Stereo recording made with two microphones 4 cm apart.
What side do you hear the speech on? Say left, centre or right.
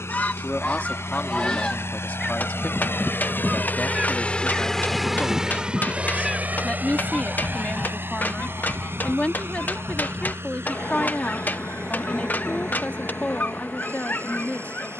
left.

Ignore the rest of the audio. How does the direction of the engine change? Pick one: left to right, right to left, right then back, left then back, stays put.
left to right.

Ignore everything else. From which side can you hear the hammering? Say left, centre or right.
left.